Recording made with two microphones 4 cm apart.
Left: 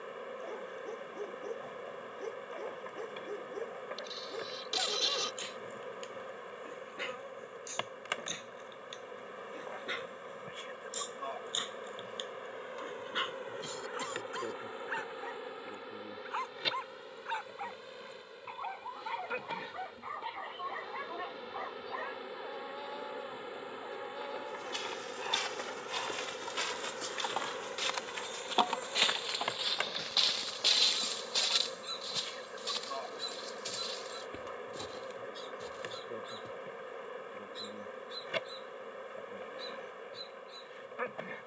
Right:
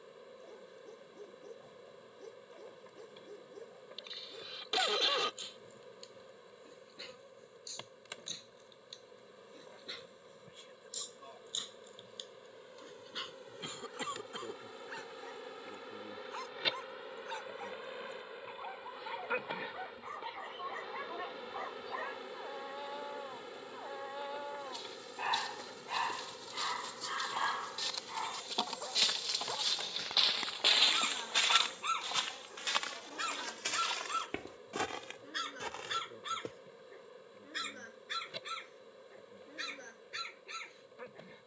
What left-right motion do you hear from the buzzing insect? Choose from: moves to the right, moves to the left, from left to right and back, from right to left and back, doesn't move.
from left to right and back.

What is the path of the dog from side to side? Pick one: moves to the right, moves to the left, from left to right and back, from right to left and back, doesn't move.
moves to the right.